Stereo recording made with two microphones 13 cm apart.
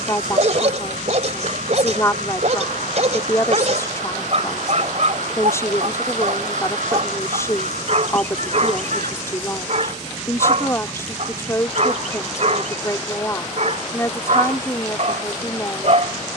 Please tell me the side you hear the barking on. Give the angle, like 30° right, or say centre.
60° right.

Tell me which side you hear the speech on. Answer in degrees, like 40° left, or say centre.
20° left.